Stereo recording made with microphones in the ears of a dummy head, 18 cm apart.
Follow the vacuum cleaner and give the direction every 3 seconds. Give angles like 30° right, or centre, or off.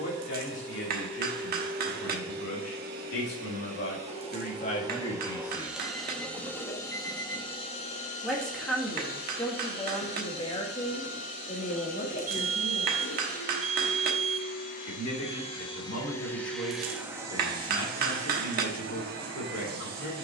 50° right, 20° right, 20° left, 50° left, 50° left, centre, 40° right.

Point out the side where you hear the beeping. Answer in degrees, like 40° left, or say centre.
40° right.